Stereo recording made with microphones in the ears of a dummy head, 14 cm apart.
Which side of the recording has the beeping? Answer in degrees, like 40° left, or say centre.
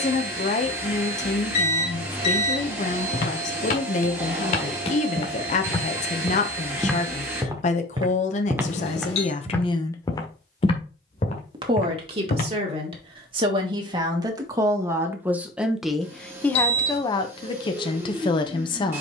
40° left.